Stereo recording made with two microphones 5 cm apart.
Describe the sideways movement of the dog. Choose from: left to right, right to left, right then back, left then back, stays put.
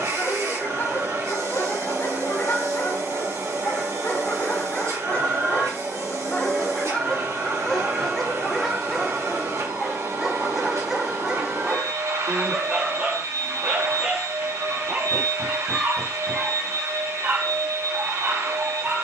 left to right.